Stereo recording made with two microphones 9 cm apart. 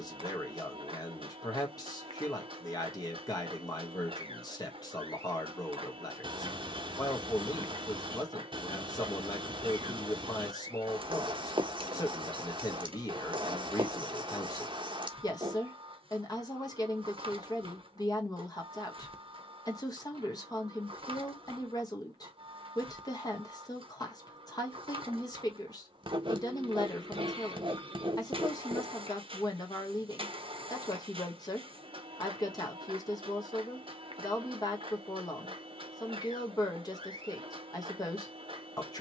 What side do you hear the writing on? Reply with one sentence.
In this clip you hear the writing on the right.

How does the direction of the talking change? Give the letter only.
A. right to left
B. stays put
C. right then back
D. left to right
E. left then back
B.